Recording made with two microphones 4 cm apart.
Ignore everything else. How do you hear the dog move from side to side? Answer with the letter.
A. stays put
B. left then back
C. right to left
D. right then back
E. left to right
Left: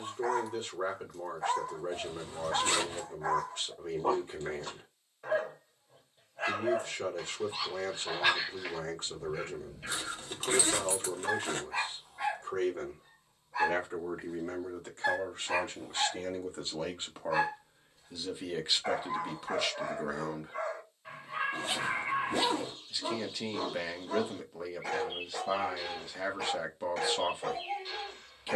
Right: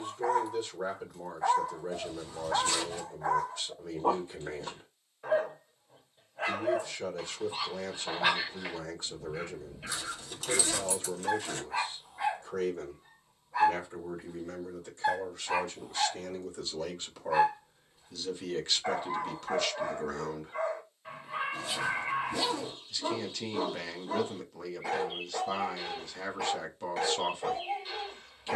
A.